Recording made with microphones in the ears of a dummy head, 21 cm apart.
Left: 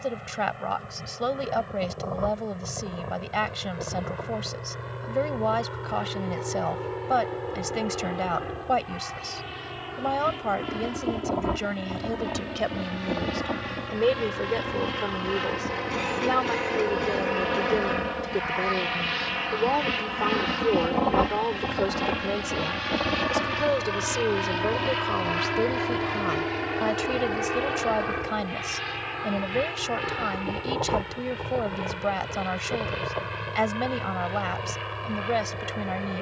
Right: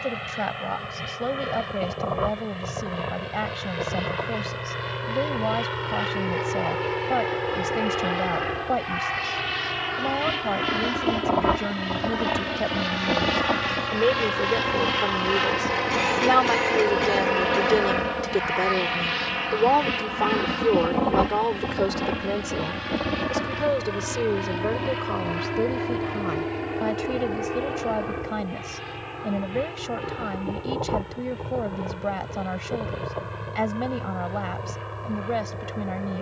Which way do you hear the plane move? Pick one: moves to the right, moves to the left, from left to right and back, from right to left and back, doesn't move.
moves to the left.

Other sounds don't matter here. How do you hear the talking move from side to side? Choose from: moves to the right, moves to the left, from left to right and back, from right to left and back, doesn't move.
from left to right and back.